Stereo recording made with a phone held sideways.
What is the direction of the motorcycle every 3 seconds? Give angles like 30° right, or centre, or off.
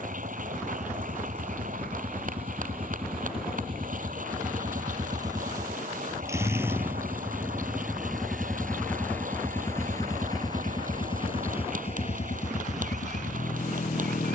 40° right, 30° right, 10° right, 30° left, 50° left.